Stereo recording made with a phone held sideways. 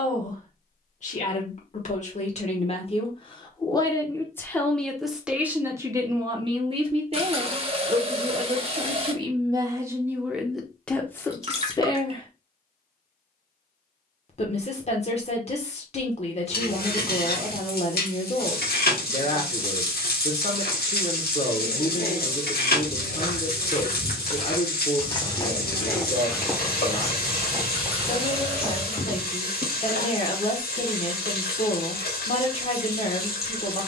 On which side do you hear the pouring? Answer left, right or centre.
right.